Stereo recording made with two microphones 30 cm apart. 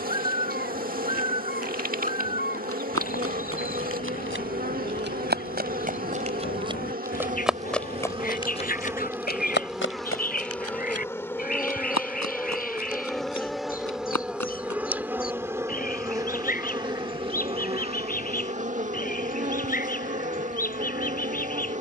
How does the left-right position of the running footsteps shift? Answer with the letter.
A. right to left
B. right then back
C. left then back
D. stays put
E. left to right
A.